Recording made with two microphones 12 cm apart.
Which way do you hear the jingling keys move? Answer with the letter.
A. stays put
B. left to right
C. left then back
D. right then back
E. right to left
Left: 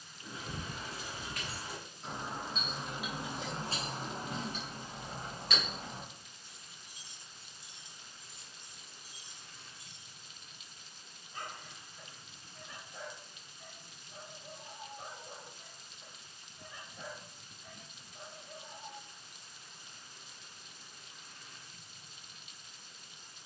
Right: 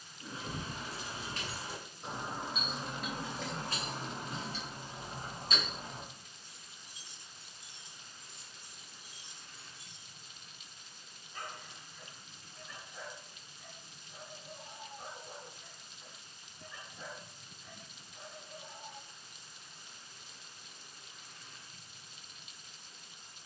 C.